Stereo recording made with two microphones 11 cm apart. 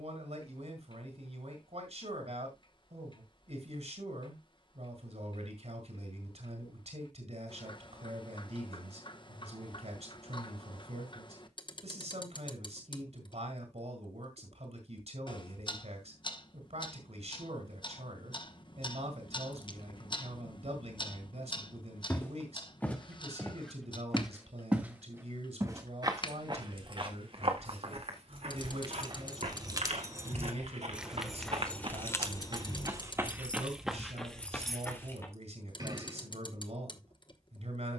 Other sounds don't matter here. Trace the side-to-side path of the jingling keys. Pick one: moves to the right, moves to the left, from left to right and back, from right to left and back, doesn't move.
from right to left and back.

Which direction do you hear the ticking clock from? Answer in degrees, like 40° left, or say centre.
40° left.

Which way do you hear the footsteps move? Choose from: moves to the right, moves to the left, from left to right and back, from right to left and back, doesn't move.
from left to right and back.